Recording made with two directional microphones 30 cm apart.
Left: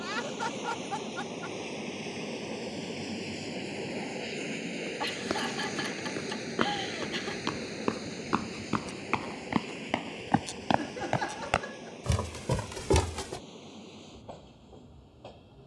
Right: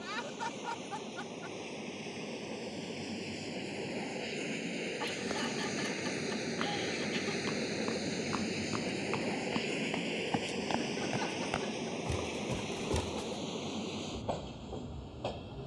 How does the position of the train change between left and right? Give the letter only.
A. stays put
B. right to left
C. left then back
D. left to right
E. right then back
D.